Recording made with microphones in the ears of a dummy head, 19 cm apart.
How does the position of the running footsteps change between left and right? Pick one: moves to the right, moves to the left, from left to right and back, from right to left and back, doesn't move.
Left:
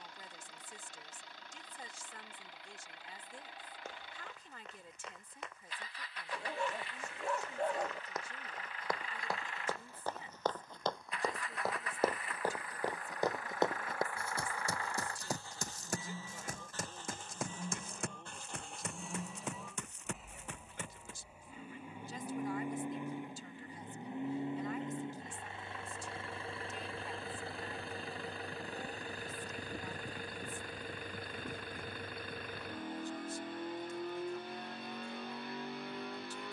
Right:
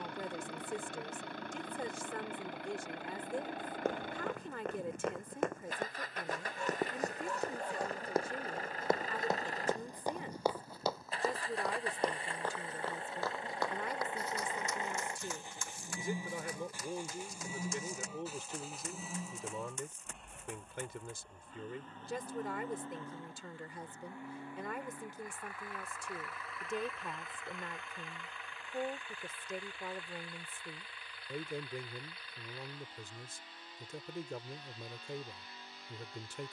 moves to the left.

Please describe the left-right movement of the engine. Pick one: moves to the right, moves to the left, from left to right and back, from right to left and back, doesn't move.
moves to the left.